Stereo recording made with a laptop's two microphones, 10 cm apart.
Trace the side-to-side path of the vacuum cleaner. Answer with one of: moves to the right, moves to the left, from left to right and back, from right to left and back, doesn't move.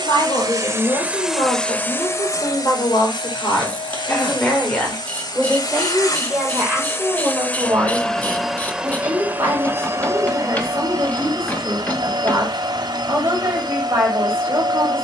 from right to left and back.